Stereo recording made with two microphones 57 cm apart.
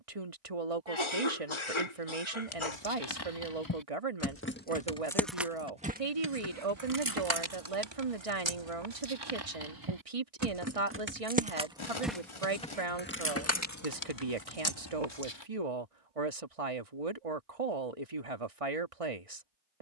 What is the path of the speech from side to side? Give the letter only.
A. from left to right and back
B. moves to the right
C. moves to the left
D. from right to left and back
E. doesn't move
E.